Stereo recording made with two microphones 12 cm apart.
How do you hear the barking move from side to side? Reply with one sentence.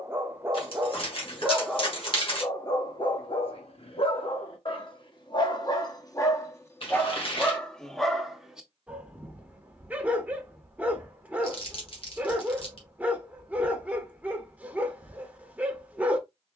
In this clip you hear the barking move from right to left and back again.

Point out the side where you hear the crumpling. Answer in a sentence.
In this clip you hear the crumpling on the left.